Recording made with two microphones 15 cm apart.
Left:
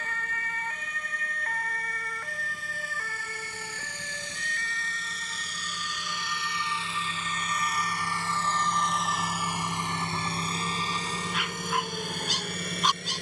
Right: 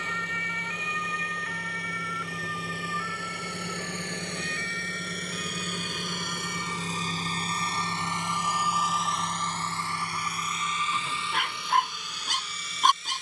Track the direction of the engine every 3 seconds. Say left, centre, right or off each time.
right, right, right, left, left.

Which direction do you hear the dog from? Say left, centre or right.
right.